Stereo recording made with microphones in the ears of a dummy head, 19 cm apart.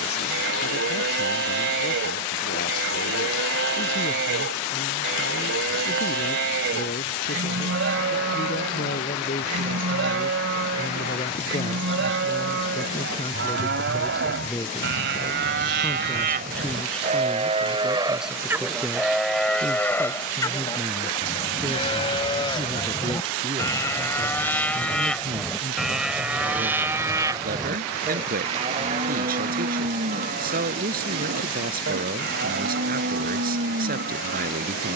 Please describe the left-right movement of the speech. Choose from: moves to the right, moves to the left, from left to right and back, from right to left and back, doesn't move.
moves to the right.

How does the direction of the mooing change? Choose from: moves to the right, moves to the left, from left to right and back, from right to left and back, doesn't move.
from right to left and back.